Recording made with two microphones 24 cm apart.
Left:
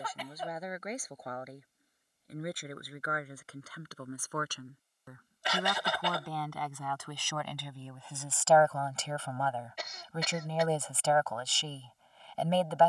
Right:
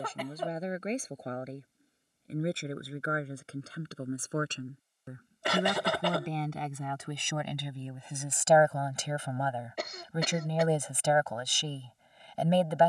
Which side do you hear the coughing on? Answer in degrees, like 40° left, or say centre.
60° right.